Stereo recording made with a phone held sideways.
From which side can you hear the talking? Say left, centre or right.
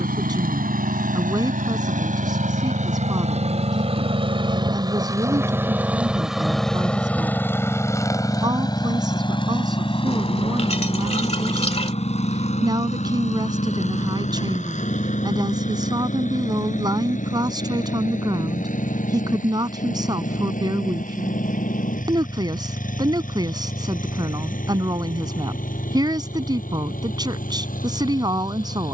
right.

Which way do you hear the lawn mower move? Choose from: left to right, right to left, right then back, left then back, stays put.
right to left.